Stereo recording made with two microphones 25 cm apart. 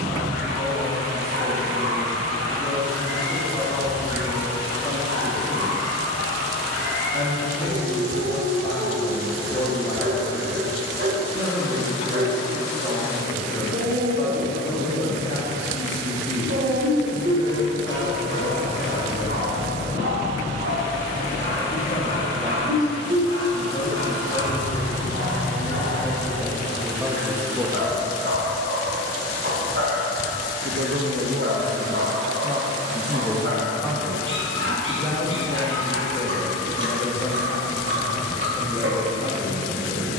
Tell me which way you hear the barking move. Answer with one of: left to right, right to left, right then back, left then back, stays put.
stays put.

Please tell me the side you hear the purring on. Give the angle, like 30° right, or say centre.
40° right.